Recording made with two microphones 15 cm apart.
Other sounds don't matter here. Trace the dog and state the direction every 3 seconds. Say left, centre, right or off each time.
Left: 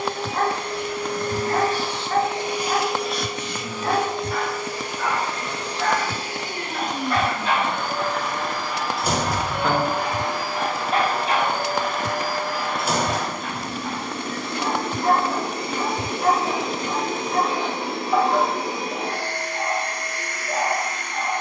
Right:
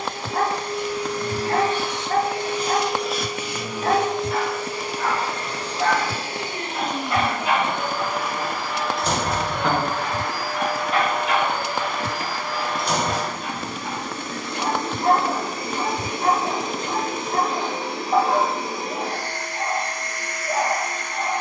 right, right, centre, left, centre, right, right.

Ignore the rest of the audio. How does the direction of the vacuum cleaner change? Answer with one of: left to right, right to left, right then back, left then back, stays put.
right then back.